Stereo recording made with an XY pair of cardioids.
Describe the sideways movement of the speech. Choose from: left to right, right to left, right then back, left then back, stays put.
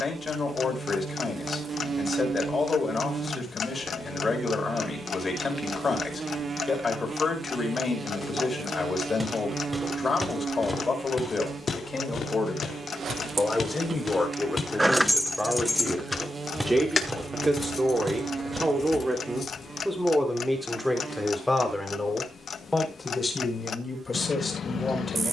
right then back.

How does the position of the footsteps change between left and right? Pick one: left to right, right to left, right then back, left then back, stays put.
left then back.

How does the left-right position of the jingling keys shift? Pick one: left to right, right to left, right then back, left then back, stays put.
right to left.